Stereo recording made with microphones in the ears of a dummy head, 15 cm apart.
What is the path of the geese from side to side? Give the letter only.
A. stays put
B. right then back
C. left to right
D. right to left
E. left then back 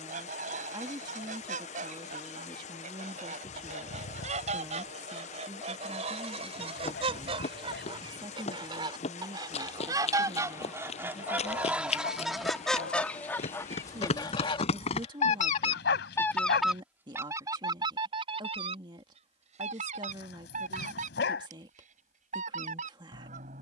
E.